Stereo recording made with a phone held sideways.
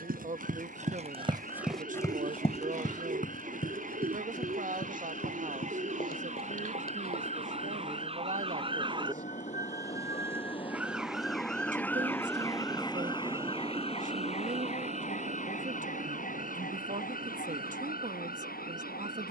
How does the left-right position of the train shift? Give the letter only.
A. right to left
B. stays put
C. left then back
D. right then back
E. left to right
E.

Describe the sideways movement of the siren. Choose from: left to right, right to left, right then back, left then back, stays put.
right to left.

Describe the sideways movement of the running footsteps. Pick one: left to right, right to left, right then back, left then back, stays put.
right to left.